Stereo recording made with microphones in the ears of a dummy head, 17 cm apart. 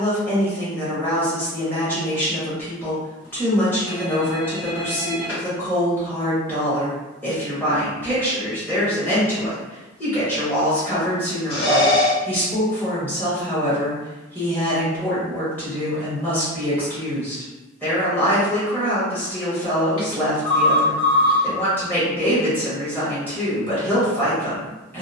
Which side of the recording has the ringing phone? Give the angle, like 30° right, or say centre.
80° left.